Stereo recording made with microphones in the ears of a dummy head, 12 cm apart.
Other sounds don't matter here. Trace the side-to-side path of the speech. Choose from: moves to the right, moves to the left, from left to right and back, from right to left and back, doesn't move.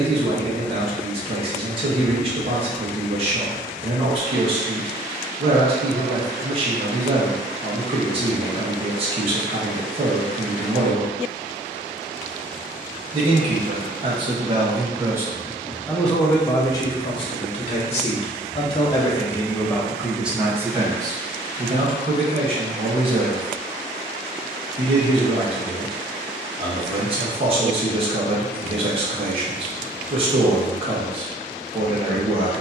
from right to left and back.